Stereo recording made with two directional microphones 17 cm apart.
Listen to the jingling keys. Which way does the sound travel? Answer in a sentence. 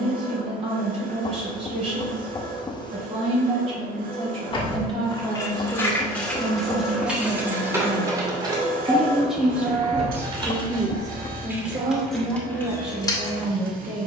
In this clip you hear the jingling keys move from left to right and back again.